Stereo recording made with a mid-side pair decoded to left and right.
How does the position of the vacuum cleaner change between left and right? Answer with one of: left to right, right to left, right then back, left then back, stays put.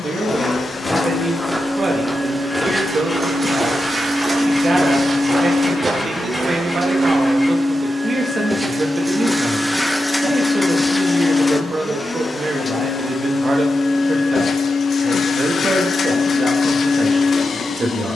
right then back.